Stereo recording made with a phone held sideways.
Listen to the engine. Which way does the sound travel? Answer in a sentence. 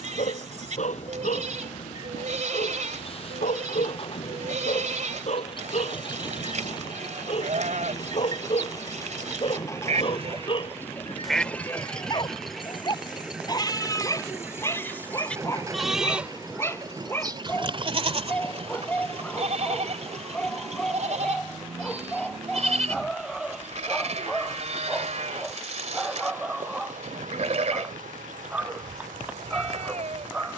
In this clip you hear the engine go from the left side to the right.